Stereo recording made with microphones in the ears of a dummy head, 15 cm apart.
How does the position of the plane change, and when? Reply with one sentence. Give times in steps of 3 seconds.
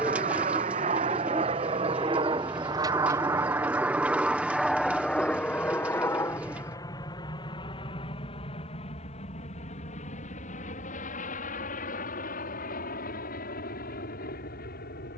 In this clip you hear the plane on the right from 0 s, in the centre from 3 s and on the left from 6 s.